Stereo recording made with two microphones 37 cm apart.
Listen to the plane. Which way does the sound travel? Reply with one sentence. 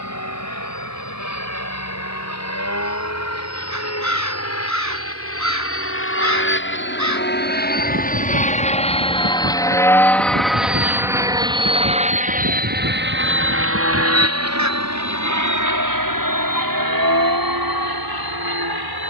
In this clip you hear the plane go from the left side to the right.